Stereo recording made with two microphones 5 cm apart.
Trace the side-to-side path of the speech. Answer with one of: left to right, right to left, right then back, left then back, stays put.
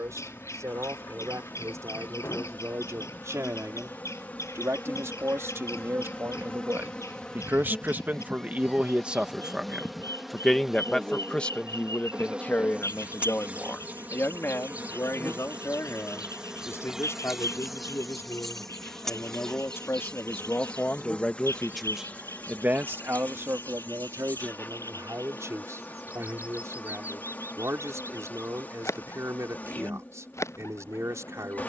left then back.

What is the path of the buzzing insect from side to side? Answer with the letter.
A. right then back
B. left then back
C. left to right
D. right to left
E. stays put
A.